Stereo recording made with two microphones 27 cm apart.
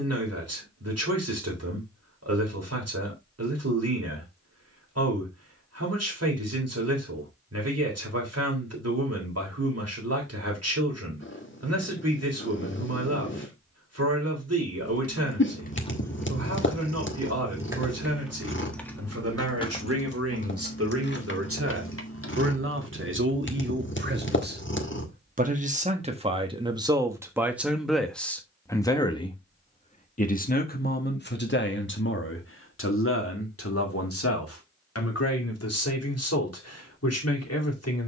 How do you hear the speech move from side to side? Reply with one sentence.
In this clip you hear the speech travel towards the left.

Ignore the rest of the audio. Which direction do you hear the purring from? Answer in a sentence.
You can hear the purring on the left.